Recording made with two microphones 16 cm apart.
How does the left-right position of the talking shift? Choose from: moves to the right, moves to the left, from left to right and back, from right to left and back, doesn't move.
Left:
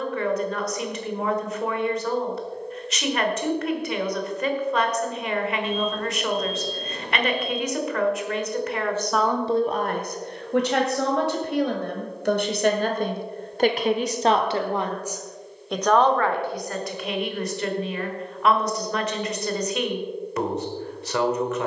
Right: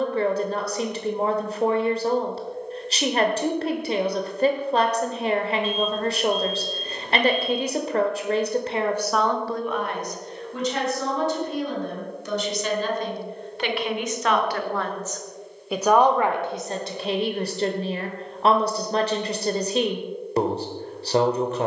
from right to left and back.